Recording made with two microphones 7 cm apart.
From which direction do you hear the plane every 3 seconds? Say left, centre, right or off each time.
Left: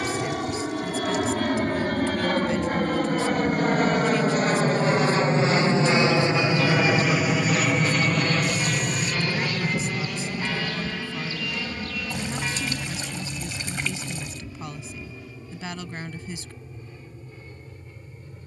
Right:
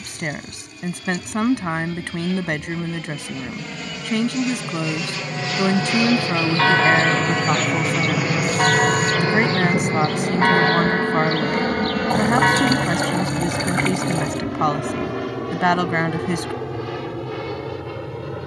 left, left, centre, right, right, right.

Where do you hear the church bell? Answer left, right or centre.
right.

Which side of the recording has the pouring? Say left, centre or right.
right.